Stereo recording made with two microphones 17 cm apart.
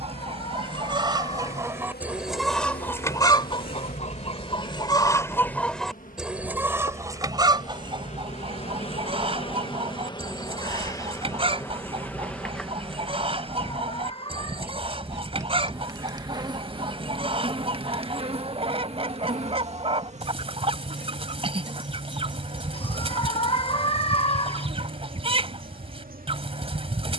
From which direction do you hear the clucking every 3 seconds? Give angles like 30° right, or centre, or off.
20° right, 20° left, 20° right, 30° right, 30° right, 30° right, 30° right, 30° right, 30° right.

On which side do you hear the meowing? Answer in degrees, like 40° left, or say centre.
30° left.